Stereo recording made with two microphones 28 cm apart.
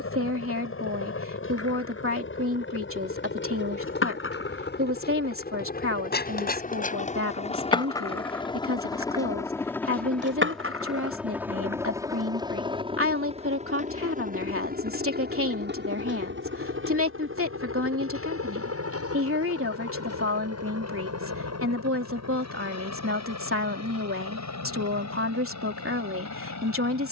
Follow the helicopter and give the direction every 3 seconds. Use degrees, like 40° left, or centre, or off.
50° left, 40° left, 20° left, centre, 20° right, 40° right, 50° right, 60° right, 70° right.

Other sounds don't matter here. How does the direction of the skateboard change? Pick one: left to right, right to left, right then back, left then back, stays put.
left to right.